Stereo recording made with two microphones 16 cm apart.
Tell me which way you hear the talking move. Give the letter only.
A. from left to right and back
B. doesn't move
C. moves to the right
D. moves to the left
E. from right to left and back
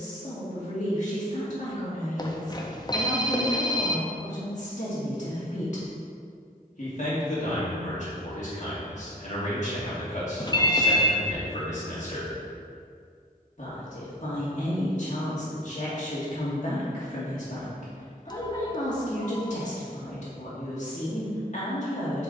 B.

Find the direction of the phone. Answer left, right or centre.
left.